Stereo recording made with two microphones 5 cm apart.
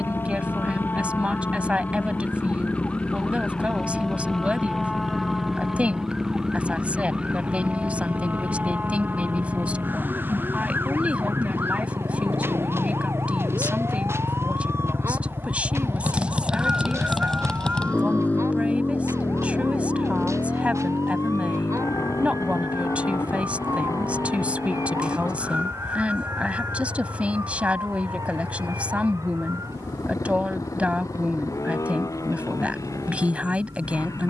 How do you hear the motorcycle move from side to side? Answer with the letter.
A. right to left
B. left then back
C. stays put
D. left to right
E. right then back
A.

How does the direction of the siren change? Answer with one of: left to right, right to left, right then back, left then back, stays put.
left to right.